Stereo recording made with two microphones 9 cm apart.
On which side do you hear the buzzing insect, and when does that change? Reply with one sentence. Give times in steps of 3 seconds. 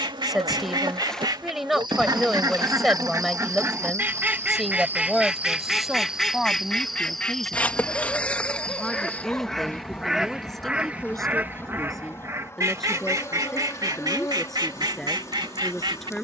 You can hear the buzzing insect on the right from 0 s, in the centre from 6 s and on the left from 9 s.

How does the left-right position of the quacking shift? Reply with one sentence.
You can hear the quacking go left and come back.